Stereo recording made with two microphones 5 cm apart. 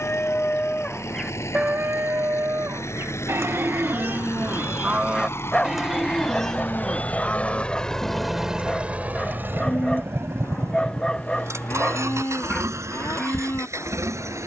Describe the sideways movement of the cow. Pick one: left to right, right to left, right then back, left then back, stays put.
right then back.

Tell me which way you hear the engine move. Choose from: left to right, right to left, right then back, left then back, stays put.
left to right.